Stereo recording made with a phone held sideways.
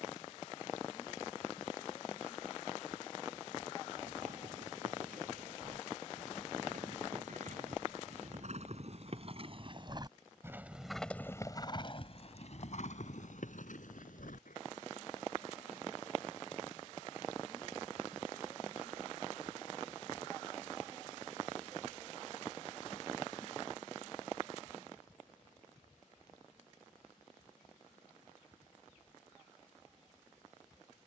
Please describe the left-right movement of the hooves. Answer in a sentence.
In this clip you hear the hooves travel towards the left.